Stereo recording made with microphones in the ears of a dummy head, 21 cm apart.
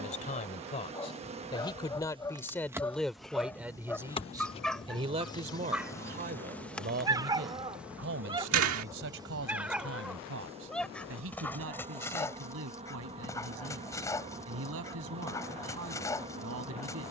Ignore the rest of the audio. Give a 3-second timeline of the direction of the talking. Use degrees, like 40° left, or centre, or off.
20° left, 20° right, 50° right, 70° right, 70° right, 70° right.